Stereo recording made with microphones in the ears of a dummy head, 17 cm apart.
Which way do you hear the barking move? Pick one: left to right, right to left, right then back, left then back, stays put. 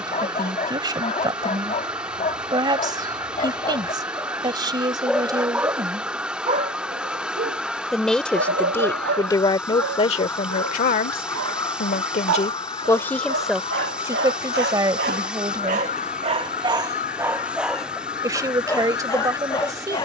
right then back.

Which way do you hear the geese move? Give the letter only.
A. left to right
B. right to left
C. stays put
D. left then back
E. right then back
B.